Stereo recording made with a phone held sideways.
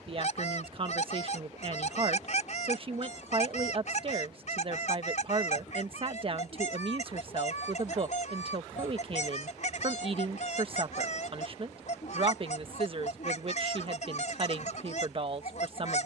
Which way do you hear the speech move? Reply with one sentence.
In this clip you hear the speech stay in one place.